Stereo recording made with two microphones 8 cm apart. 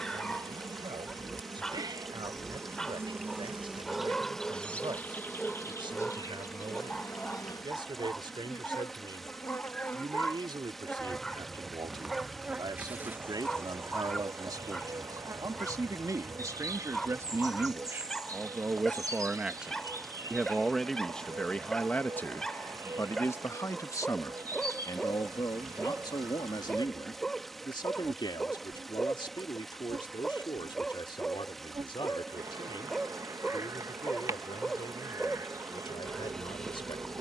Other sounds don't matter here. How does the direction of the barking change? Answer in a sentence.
You can hear the barking stay put.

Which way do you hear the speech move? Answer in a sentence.
In this clip you hear the speech move from right to left.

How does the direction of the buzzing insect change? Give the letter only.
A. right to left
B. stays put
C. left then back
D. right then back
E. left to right
C.